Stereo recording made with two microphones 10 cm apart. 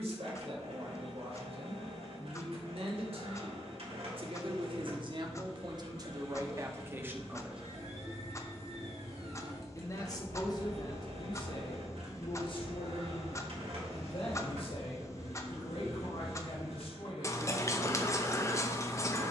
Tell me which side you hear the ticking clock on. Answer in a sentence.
You can hear the ticking clock on the left.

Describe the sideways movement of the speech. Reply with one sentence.
In this clip you hear the speech travel towards the left.